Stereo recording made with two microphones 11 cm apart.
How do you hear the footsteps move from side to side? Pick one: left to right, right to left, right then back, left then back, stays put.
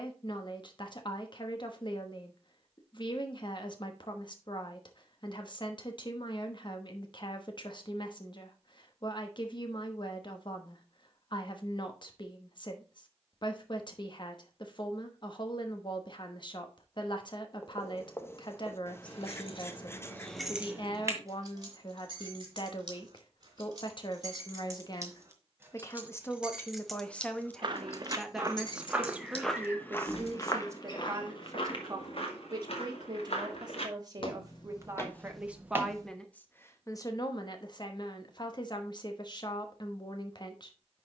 left then back.